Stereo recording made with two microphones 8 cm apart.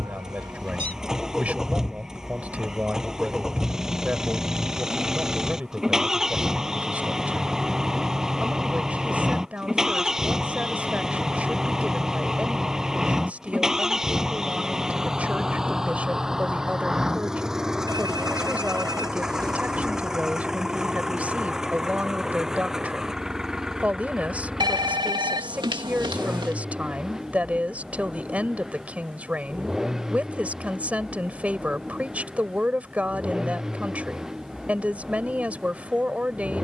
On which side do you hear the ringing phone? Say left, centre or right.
right.